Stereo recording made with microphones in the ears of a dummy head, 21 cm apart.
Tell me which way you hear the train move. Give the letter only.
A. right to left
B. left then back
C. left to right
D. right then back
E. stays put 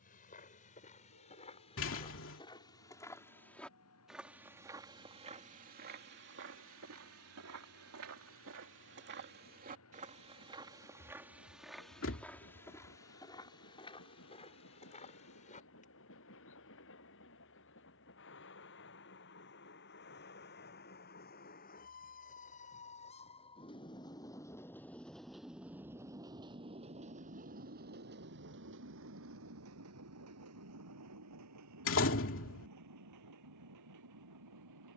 C.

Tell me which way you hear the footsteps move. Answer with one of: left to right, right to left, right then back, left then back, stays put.
right then back.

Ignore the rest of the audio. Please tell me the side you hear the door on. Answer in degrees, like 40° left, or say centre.
60° left.